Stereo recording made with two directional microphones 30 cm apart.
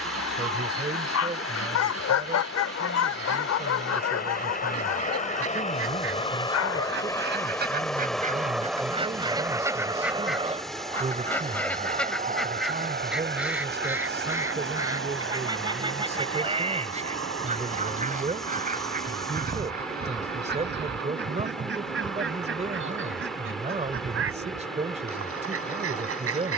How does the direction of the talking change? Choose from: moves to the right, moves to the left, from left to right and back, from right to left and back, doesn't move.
doesn't move.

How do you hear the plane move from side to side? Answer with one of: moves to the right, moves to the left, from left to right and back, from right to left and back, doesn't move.
moves to the right.